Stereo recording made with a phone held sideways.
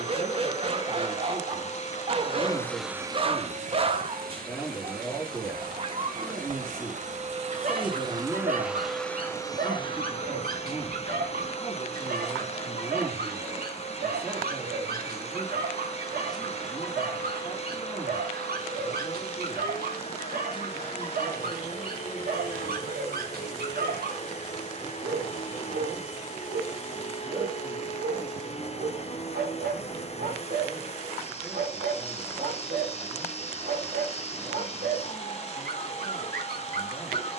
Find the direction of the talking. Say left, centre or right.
centre.